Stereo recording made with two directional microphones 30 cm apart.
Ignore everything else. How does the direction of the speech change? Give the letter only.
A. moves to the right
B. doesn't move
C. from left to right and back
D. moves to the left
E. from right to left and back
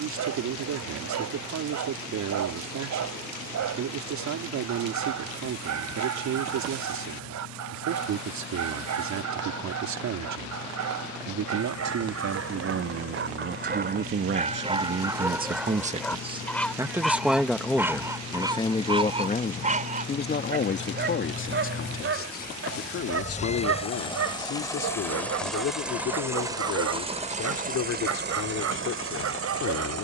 D.